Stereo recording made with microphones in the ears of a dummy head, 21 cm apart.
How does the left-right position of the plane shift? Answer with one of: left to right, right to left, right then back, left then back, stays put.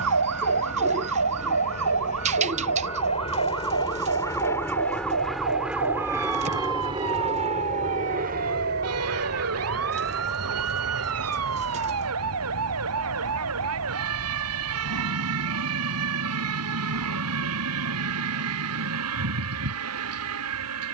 left to right.